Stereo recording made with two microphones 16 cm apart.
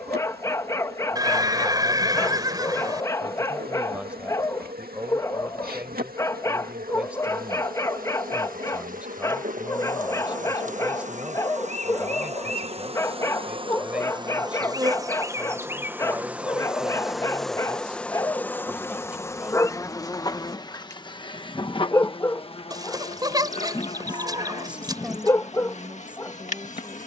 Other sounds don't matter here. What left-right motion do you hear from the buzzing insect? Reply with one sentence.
You can hear the buzzing insect travel towards the left.